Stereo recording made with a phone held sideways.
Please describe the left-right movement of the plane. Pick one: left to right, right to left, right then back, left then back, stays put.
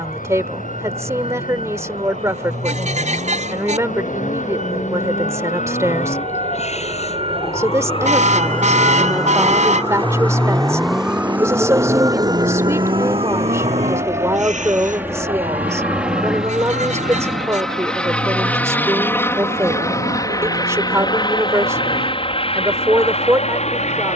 right to left.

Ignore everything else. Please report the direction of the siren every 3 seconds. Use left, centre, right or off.
left, left, left, centre, right, right, right, right.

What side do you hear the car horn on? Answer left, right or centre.
right.